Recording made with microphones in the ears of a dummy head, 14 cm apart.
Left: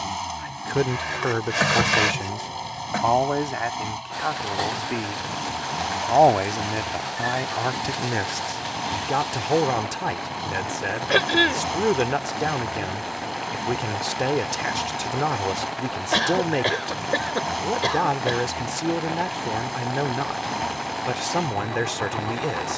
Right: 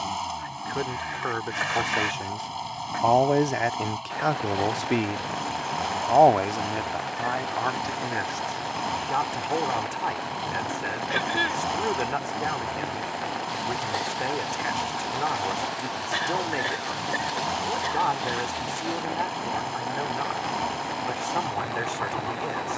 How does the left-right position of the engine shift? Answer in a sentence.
In this clip you hear the engine stay in one place.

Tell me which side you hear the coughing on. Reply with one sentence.
In this clip you hear the coughing on the left.